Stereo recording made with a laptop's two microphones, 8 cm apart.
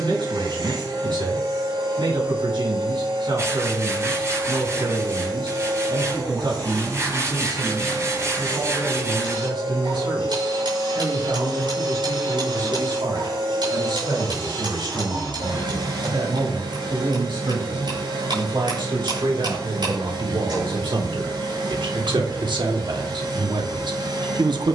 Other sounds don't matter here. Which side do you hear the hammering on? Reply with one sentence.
In this clip you hear the hammering on the right.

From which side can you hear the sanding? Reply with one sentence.
You can hear the sanding on the right.